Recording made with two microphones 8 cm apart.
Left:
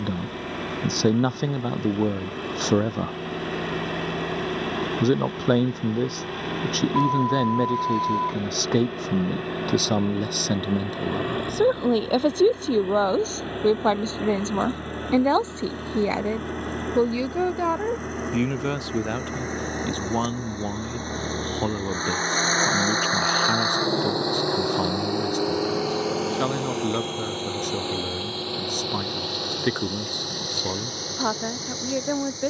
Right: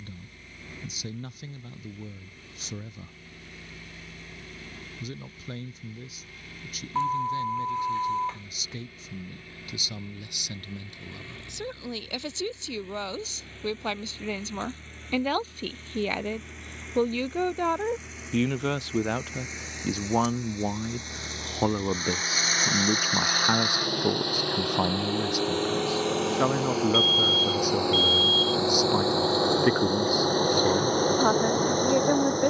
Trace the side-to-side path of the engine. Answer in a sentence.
In this clip you hear the engine move to the right.